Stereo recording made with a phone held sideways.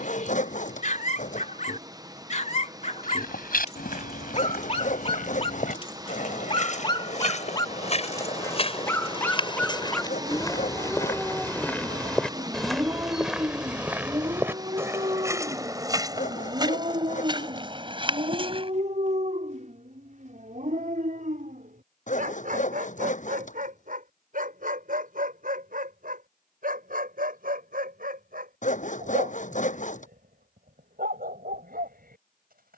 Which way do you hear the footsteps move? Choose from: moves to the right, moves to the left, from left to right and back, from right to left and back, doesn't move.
moves to the right.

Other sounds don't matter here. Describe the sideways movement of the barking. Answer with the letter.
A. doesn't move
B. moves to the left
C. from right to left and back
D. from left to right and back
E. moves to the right
E.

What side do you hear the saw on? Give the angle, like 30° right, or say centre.
60° left.